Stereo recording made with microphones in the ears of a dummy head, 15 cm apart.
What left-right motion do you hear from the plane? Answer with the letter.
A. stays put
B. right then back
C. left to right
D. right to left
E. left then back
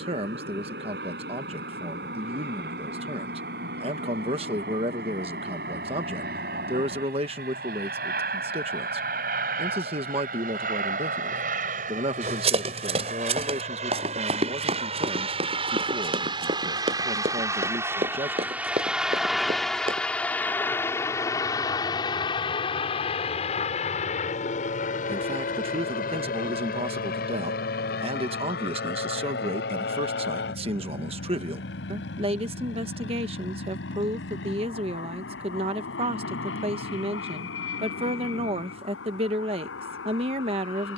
D.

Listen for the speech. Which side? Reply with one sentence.
In this clip you hear the speech on the right.